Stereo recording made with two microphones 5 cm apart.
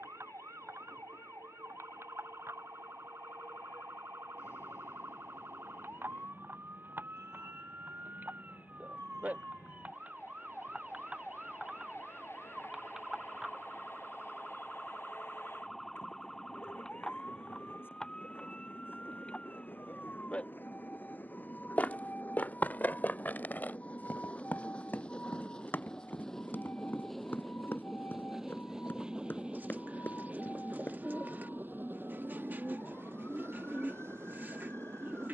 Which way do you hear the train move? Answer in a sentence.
You can hear the train go from the left side to the right.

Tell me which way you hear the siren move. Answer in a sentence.
In this clip you hear the siren move to the left.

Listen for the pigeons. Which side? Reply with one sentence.
You can hear the pigeons on the right.